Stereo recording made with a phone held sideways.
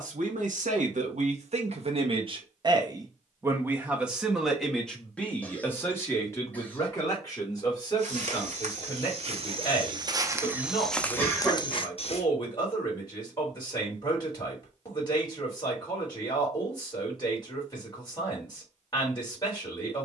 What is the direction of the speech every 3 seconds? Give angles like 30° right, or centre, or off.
60° right, centre, 30° left, 30° left, 30° left, 30° left, 30° left.